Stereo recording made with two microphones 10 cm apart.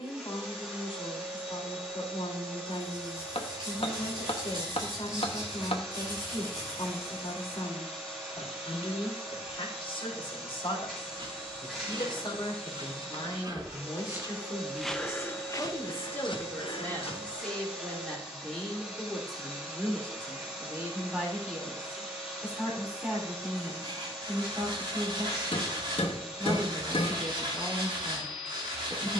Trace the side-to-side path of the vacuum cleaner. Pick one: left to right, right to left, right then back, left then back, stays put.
stays put.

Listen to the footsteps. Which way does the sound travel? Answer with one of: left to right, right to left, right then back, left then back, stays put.
right to left.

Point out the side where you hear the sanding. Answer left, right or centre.
right.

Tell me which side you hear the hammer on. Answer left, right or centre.
left.